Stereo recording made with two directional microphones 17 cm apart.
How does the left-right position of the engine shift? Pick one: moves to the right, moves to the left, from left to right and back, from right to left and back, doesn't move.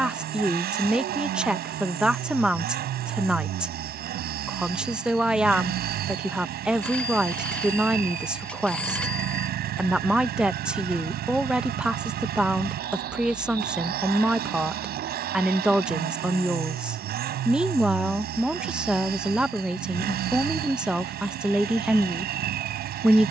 doesn't move.